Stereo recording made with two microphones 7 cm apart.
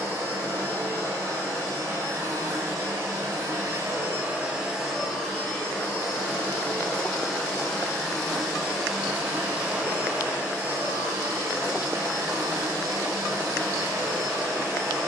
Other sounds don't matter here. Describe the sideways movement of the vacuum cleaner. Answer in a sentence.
You can hear the vacuum cleaner go left and come back.